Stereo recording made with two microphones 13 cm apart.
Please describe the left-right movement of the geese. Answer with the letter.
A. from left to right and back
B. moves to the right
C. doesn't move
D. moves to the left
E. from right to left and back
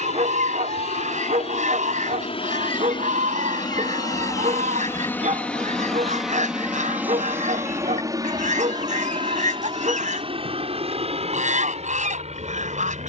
C.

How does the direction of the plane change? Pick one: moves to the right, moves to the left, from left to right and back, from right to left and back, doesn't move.
moves to the right.